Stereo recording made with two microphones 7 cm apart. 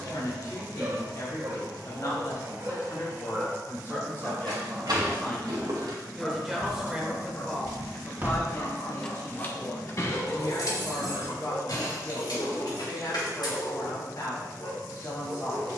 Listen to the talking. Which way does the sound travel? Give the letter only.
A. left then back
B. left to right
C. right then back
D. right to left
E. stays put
C.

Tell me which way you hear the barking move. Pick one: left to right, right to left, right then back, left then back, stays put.
right to left.